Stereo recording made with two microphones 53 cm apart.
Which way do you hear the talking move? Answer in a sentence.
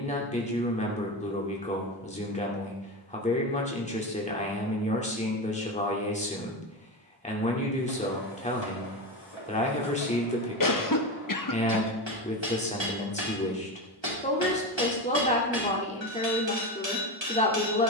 You can hear the talking stay put.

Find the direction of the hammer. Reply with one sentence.
You can hear the hammer on the right.